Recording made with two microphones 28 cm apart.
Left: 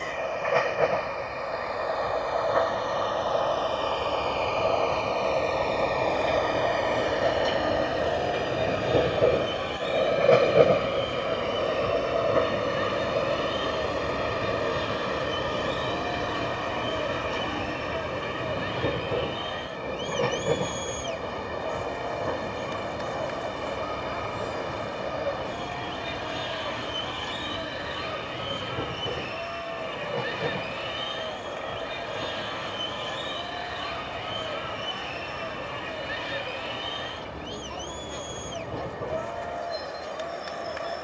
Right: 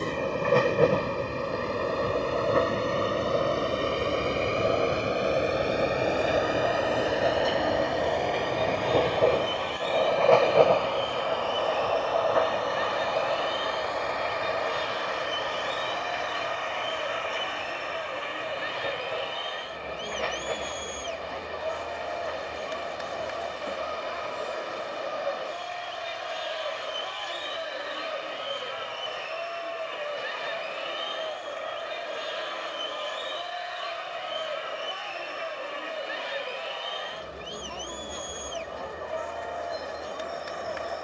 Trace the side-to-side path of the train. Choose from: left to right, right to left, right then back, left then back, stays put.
right to left.